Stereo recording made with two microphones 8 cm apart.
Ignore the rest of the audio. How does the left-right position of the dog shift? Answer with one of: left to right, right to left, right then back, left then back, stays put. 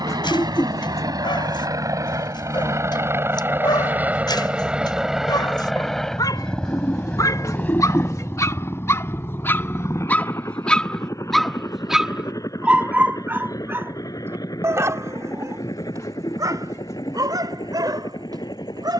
left to right.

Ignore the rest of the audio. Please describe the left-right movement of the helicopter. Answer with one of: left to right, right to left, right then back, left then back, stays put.
right to left.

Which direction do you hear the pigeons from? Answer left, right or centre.
left.